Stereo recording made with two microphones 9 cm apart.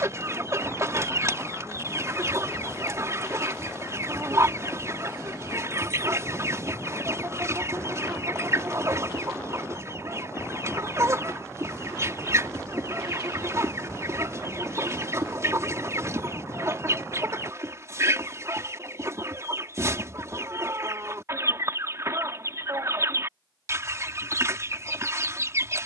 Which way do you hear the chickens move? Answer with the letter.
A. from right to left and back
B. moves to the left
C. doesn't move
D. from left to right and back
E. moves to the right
C.